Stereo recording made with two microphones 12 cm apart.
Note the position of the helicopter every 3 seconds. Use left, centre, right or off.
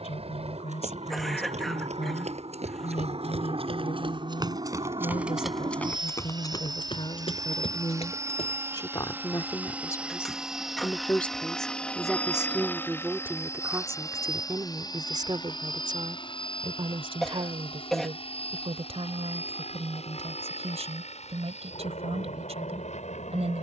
right, right, right, centre, left, left, left, left.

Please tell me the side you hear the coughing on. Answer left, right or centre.
centre.